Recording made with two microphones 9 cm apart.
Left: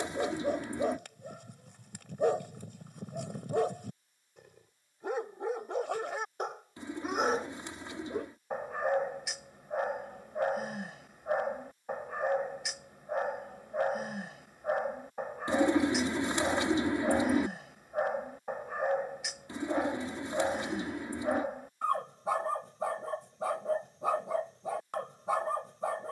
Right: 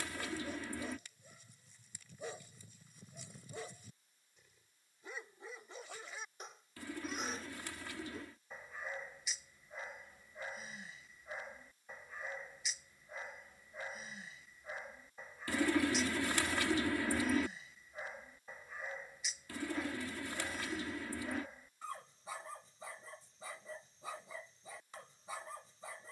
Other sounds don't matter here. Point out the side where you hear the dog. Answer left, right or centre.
left.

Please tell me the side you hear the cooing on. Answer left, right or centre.
left.